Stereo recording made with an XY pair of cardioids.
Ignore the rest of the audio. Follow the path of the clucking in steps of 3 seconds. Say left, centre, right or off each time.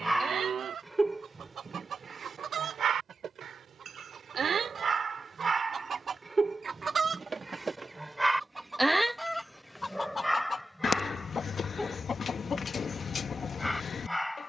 right, right, right, left, left.